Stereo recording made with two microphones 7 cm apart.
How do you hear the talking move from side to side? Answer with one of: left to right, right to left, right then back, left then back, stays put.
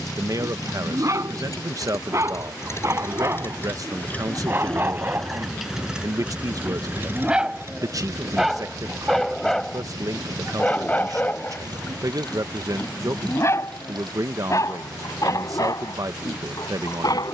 stays put.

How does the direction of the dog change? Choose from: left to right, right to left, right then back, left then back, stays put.
right to left.